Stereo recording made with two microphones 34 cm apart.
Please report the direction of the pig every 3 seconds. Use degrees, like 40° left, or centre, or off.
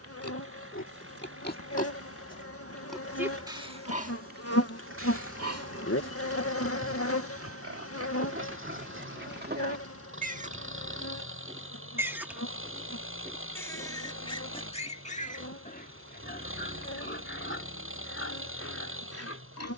30° left, 30° right, 40° right, 20° right, 10° left, 30° left, 40° left.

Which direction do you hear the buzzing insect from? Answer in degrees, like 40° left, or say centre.
40° left.